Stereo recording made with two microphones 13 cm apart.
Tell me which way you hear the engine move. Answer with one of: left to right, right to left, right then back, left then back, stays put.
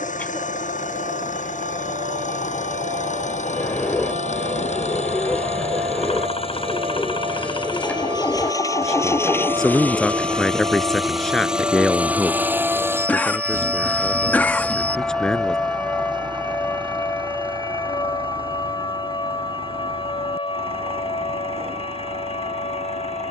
left to right.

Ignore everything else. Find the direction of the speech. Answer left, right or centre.
centre.